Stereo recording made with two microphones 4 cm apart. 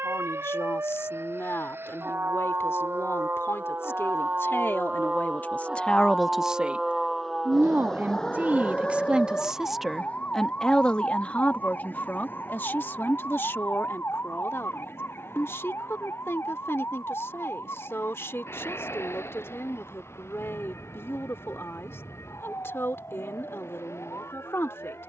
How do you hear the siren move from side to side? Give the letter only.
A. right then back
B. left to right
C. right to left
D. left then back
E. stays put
C.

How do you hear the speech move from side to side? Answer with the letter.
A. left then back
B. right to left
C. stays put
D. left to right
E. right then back
E.